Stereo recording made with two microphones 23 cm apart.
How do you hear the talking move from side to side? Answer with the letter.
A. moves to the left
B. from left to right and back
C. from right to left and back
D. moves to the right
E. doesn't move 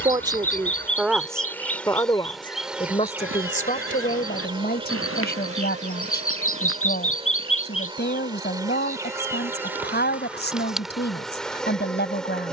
A.